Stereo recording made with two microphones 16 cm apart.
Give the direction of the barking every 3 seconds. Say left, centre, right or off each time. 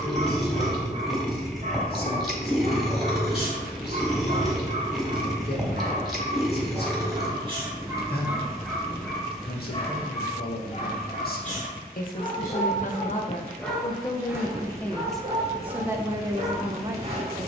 right, right, right, left, centre, right.